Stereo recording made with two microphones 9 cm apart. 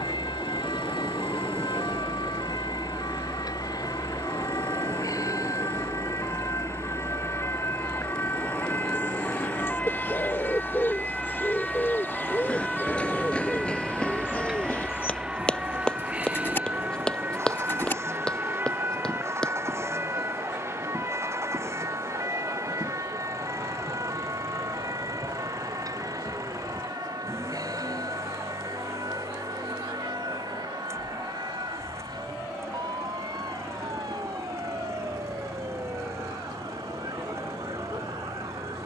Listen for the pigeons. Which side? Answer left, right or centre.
left.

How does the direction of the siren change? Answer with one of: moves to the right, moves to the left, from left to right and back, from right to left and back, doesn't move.
moves to the right.